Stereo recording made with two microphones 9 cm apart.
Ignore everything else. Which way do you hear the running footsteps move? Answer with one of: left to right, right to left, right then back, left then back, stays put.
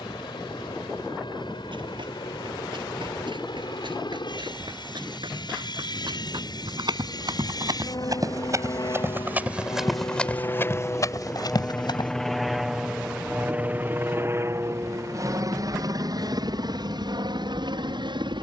right to left.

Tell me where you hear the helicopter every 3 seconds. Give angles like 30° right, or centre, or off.
70° left, 70° left, 60° left, 30° left, 20° right, 50° right.